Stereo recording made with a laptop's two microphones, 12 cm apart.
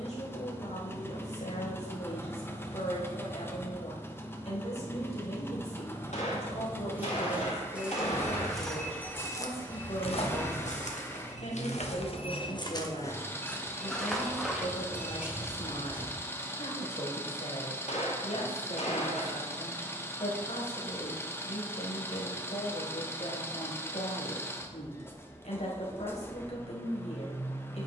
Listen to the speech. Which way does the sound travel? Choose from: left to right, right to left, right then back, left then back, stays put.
stays put.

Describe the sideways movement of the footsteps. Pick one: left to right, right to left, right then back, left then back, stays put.
left then back.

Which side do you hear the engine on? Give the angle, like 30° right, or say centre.
20° left.